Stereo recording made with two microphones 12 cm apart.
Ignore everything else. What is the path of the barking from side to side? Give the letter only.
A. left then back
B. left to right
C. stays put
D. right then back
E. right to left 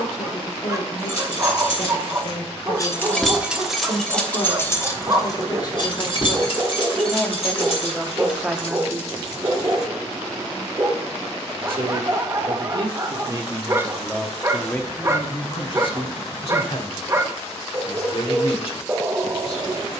C.